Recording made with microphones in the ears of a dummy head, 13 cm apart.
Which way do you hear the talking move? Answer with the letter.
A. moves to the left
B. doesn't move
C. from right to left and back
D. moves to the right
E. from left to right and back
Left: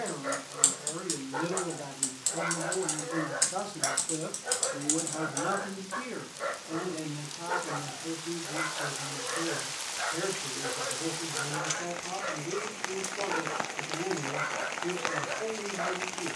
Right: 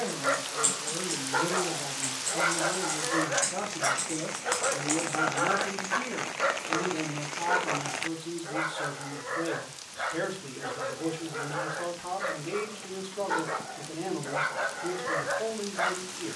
D.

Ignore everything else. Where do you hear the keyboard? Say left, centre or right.
left.